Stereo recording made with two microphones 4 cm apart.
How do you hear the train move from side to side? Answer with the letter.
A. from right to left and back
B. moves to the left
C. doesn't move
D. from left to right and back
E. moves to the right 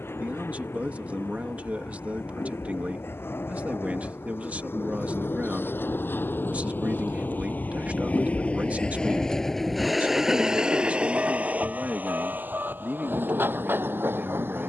E.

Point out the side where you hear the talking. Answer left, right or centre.
right.